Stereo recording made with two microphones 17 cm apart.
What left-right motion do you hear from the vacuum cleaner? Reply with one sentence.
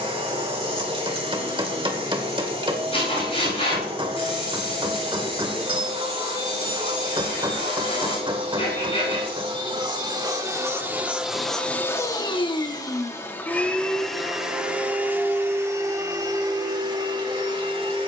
You can hear the vacuum cleaner go left and come back.